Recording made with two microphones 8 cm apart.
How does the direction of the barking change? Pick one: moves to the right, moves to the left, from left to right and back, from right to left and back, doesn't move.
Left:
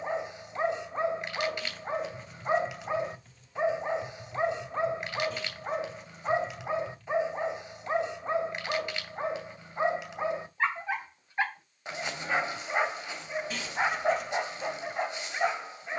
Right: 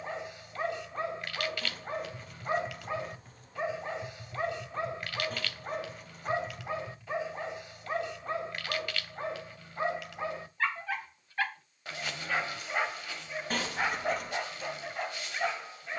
doesn't move.